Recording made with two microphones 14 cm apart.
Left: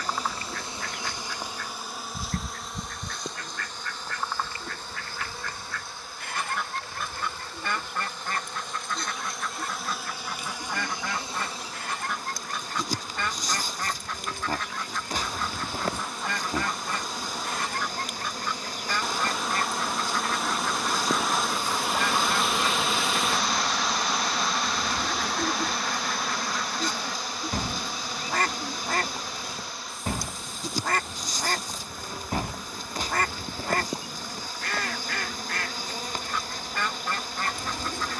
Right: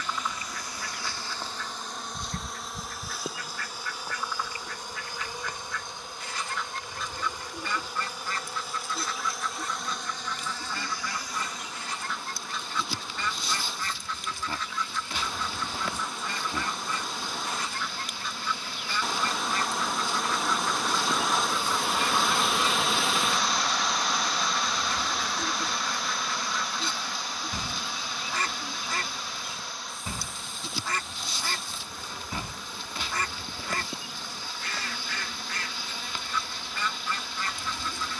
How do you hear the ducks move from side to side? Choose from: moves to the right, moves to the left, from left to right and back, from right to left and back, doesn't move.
doesn't move.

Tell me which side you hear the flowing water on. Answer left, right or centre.
centre.